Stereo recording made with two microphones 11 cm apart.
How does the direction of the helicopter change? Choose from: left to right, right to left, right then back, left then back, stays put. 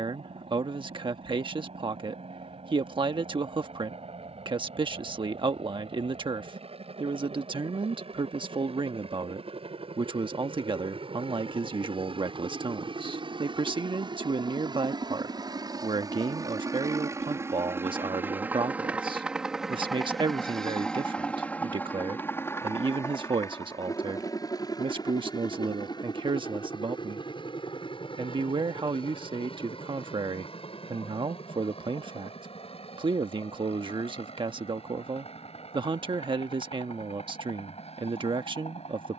right to left.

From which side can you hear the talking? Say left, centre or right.
right.